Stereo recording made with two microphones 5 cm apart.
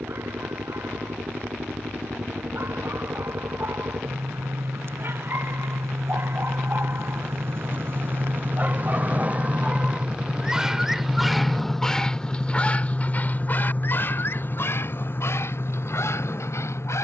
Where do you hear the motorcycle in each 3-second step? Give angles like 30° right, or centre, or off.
80° right, 70° right, 50° right, 20° right, 30° left, 50° left.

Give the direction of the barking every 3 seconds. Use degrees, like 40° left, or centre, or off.
60° right, 60° right, 40° right, 10° right, 40° left, 70° left.